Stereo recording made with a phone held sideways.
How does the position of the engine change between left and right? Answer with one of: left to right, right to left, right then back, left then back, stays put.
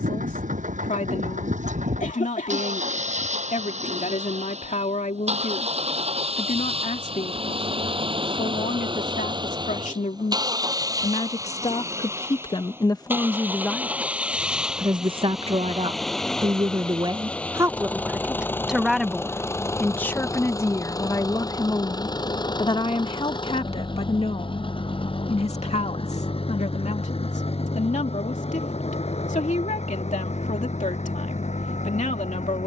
right to left.